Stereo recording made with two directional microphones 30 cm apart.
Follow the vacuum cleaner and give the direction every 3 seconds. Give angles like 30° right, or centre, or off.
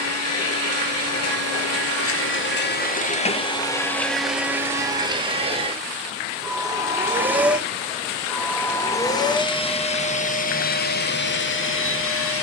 50° left, centre, centre, 30° left.